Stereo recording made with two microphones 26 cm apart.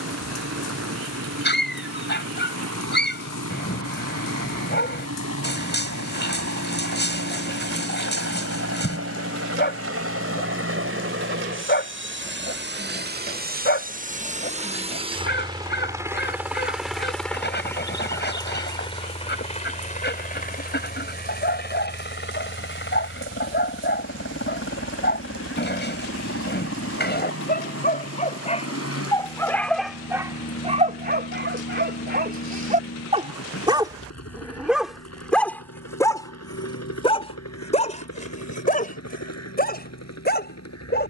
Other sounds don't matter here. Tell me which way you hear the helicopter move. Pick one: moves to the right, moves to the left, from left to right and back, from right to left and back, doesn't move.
moves to the left.